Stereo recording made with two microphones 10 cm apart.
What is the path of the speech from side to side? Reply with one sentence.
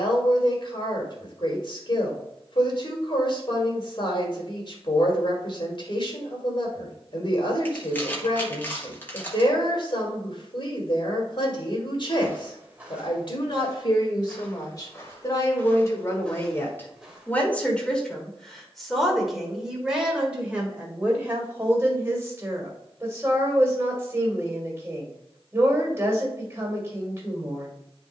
In this clip you hear the speech move to the right.